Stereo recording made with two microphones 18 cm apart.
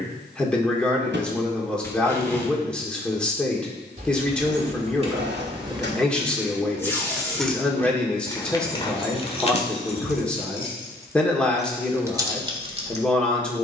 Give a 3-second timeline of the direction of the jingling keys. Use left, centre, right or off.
off, right, centre, left, right.